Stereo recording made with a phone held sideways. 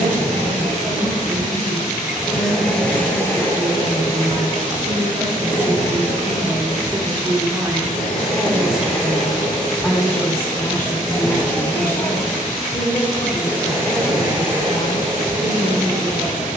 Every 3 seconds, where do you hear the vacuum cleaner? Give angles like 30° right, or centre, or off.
20° right, 40° left, 50° left, 30° left, 20° right, 40° right.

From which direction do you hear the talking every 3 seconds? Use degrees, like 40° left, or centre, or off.
80° right, 60° right, 20° right, 20° left, 40° left, 50° left.